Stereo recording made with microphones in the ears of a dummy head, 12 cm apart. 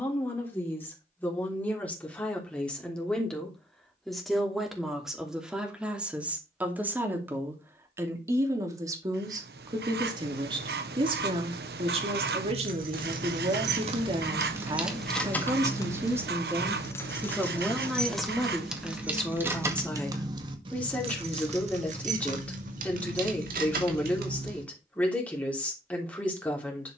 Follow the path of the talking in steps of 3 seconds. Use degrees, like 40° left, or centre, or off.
10° left, centre, 20° right, 30° right, 40° right, 20° right, 10° left, 10° left, 10° left.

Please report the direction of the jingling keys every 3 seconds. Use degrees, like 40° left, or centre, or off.
off, off, off, off, 50° right, 20° left, 20° right, 60° right, 70° right.